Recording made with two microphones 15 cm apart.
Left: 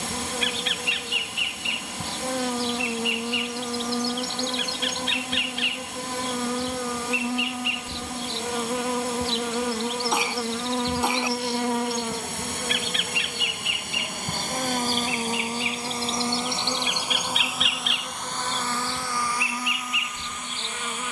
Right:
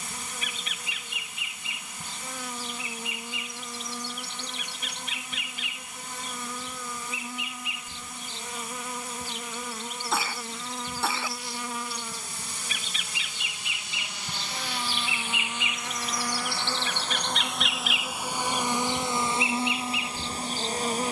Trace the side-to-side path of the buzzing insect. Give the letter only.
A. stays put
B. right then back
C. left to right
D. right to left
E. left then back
C.